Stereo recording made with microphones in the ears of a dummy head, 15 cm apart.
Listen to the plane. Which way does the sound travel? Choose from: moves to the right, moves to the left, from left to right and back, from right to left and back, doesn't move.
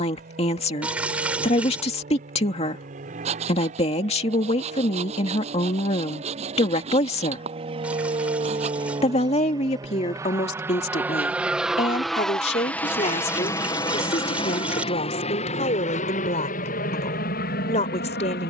moves to the left.